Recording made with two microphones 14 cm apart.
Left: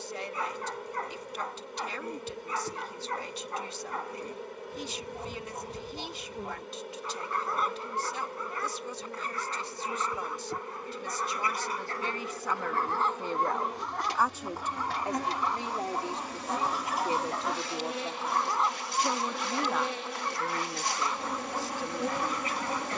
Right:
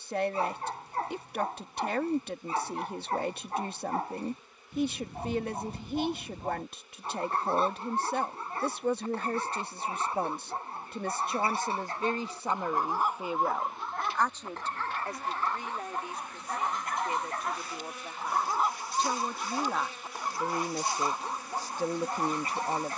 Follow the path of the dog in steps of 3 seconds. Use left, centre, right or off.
right, right, right, right, centre, centre, centre, right.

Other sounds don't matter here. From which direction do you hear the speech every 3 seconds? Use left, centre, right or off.
right, right, right, right, centre, left, centre, right.